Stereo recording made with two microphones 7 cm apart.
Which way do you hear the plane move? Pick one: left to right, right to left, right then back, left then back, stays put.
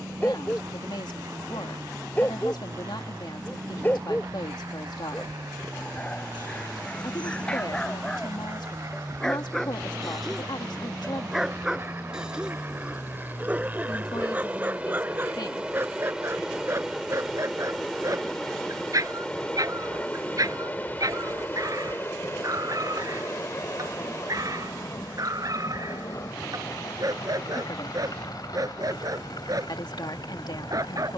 right to left.